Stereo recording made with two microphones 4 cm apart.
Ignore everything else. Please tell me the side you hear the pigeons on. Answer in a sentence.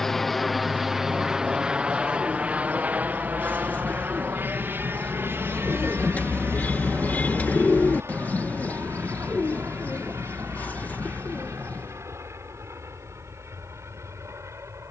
You can hear the pigeons on the left.